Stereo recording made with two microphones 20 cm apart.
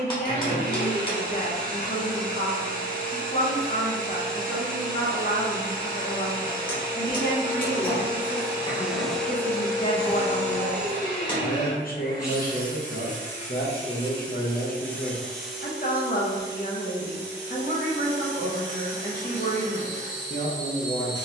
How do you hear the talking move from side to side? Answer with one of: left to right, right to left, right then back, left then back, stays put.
stays put.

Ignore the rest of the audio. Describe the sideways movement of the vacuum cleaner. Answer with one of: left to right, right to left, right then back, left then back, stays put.
left then back.